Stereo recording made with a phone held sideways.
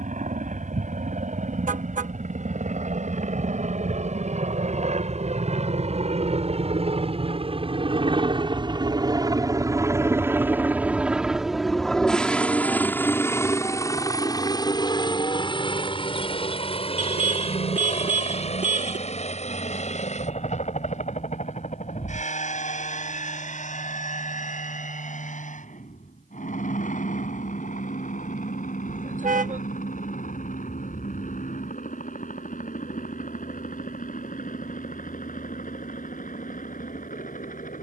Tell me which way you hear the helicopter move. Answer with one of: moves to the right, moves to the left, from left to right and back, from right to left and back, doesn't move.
moves to the left.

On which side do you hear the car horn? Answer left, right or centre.
right.